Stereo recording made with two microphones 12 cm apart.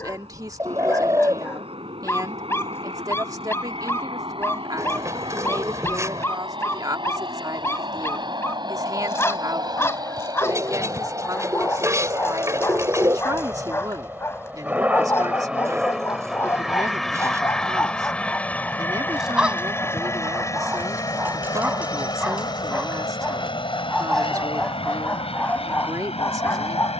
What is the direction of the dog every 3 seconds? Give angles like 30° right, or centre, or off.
20° left, 20° left, 20° left, 20° left, 20° left, 20° left, 10° right, 10° right, 10° left.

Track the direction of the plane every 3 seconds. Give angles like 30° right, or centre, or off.
50° right, 50° right, 40° right, 30° right, 20° right, centre, 20° left, 30° left, 50° left.